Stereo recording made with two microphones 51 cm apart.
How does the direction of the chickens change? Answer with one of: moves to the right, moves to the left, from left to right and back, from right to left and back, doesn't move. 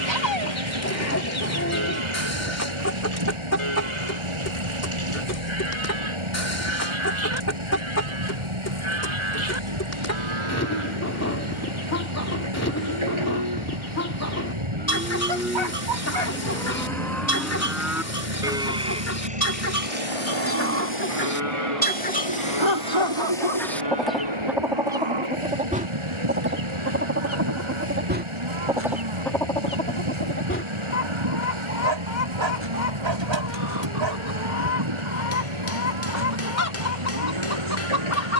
from left to right and back.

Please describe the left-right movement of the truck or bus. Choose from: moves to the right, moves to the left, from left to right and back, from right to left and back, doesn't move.
doesn't move.